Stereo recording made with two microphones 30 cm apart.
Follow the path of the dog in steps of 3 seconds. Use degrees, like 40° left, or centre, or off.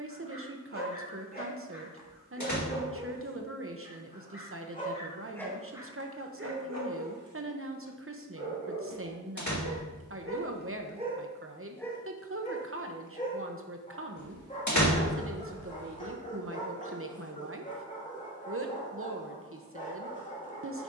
30° left, 20° left, 60° right, 30° right, 20° left, 20° left, 20° left.